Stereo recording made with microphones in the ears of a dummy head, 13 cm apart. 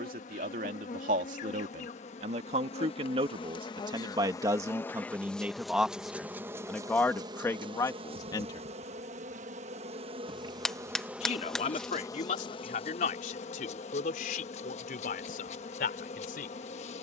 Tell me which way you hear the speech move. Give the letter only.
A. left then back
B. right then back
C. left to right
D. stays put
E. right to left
E.